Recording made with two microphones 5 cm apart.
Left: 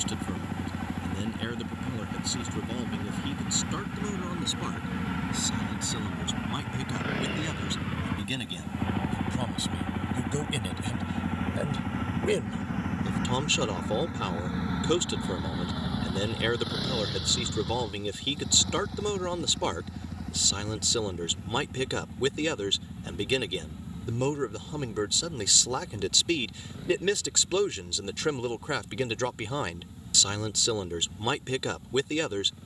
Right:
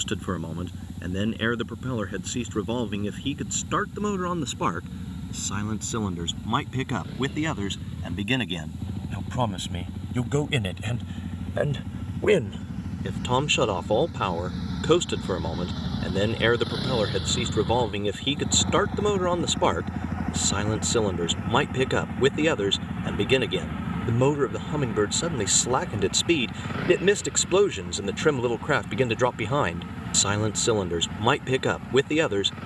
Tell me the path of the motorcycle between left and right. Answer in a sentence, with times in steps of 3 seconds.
In this clip you hear the motorcycle on the left from 0 s, in the centre from 15 s and on the right from 18 s.